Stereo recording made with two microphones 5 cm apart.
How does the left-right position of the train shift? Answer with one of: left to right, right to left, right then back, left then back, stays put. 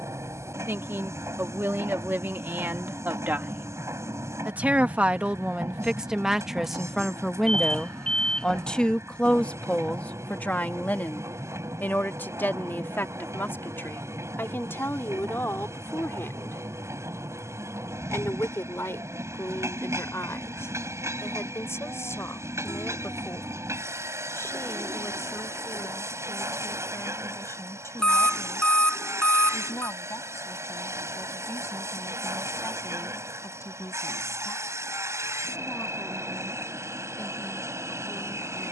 stays put.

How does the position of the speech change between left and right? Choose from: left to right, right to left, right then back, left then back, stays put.
right to left.